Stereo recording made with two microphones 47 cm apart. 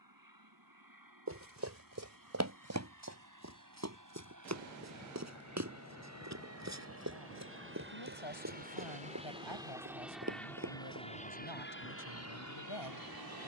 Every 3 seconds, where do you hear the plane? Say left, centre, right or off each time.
right, right, right, centre, left.